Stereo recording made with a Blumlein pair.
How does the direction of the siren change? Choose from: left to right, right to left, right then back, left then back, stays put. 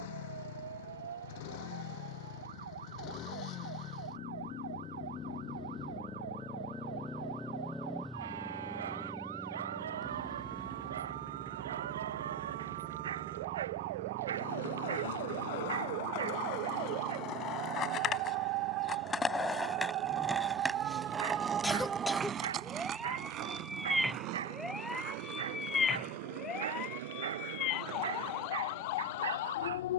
right to left.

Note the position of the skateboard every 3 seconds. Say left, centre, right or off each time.
off, off, off, off, left, left, centre, right, right, right.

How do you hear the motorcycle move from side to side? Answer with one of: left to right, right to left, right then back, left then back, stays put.
left to right.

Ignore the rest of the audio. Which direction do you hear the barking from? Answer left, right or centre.
right.